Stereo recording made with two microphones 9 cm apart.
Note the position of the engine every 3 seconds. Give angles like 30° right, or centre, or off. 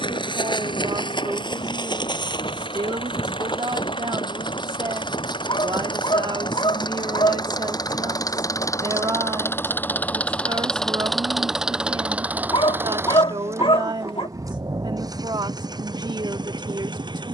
70° left, 60° left, 50° left, 10° left, 30° right, 50° right.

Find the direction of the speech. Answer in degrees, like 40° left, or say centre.
50° right.